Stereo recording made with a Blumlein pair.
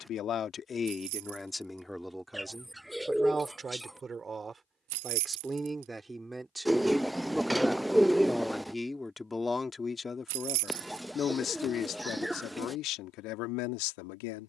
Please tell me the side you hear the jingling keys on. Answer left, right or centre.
right.